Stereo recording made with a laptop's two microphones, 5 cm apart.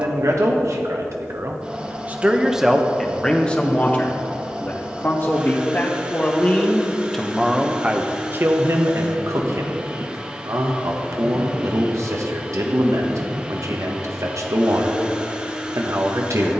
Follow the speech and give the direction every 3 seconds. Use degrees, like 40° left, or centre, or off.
50° right, 30° left, 10° right, 70° right, 70° right, 70° right.